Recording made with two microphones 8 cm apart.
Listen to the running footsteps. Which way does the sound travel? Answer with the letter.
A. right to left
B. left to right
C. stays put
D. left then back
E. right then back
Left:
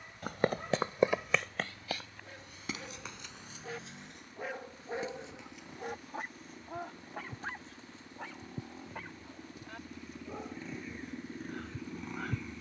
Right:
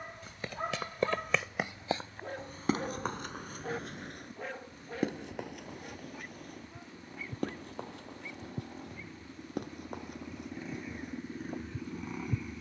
B.